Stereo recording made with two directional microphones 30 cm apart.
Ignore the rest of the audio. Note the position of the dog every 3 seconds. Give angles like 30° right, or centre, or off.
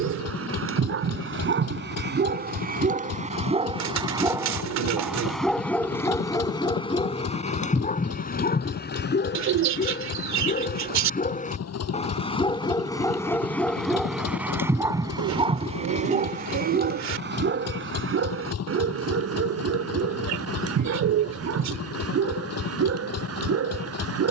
40° right, 10° right, 20° left, 30° left, 10° left, 30° right, 50° right, 50° right.